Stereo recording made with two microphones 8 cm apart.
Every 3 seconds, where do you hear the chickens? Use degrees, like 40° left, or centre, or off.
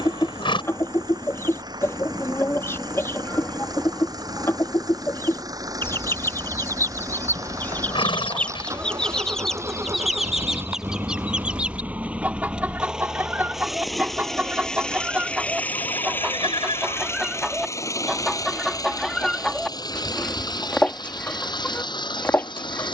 30° left, 30° left, 20° left, 10° right, 20° right, 10° right, centre, 20° left.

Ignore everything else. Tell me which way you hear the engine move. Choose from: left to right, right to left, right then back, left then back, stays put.
right to left.